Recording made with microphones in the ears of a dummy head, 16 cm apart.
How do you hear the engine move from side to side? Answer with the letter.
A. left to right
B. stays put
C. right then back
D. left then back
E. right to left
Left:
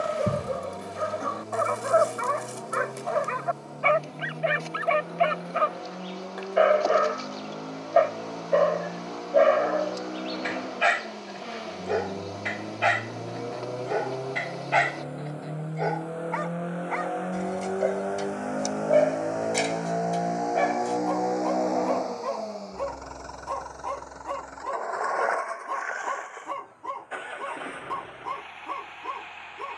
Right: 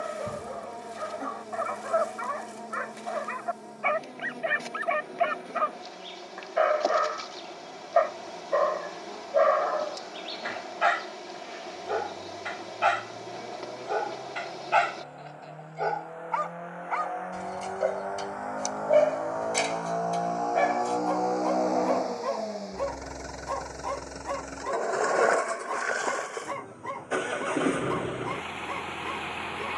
A.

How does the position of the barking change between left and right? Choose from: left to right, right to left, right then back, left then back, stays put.
left to right.